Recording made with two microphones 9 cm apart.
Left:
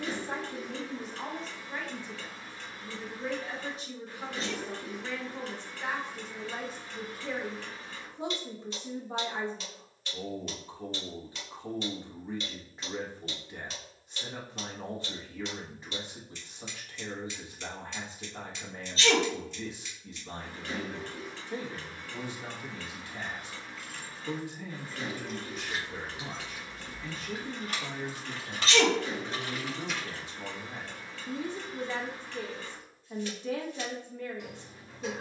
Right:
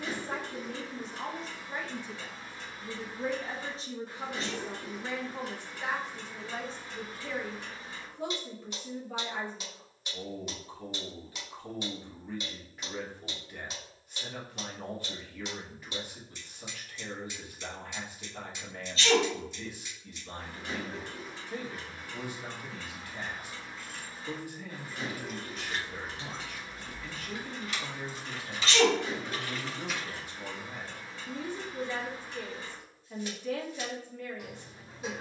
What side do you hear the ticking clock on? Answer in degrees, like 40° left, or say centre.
10° right.